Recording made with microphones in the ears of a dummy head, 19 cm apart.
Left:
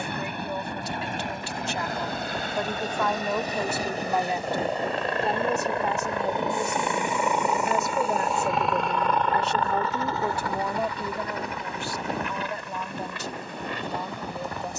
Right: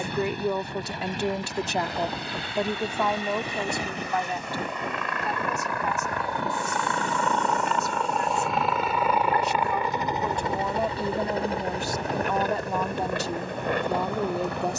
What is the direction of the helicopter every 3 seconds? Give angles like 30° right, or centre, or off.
50° left, 30° left, 10° left, 20° right, 40° right.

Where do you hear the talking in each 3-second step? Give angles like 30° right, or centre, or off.
40° right, 10° left, 40° left, centre, 50° right.